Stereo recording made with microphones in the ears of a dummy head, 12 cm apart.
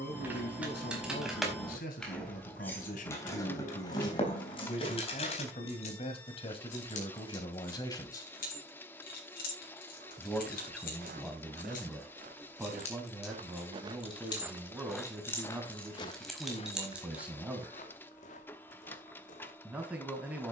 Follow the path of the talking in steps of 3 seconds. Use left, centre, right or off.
left, left, left, centre, centre, centre, centre.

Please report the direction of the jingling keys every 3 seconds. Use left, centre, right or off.
centre, left, left, left, left, centre, off.